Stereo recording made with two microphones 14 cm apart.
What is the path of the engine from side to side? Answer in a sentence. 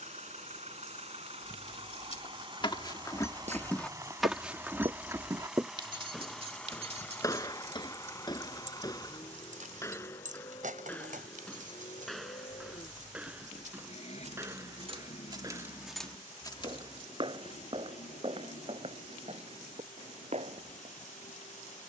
You can hear the engine go from the right side to the left.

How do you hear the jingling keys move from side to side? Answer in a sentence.
You can hear the jingling keys move from left to right and back again.